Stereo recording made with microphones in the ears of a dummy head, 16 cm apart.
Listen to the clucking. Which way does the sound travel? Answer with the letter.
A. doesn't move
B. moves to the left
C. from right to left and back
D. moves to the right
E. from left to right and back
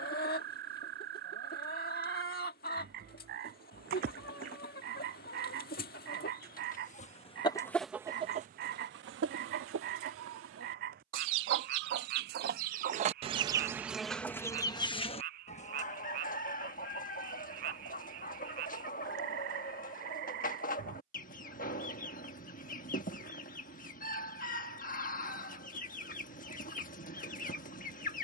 E.